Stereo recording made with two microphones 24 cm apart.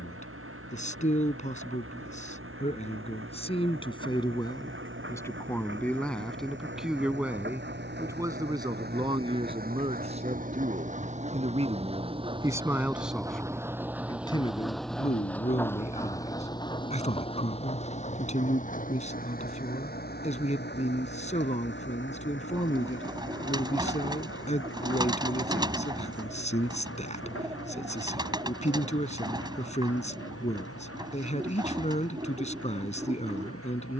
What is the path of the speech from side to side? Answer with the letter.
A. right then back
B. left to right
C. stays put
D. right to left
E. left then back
A.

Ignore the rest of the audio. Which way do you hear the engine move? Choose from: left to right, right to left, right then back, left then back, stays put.
right to left.